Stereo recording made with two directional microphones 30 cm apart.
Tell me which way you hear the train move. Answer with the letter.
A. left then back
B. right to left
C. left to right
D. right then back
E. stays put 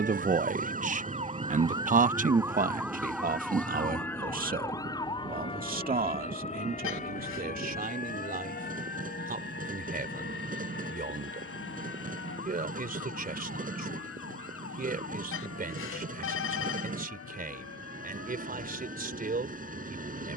E.